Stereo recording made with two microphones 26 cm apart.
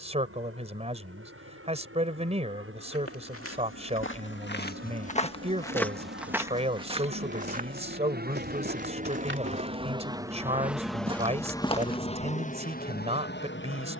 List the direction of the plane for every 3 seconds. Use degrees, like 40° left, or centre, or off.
70° right, 70° right, 50° right, 10° right, 40° left.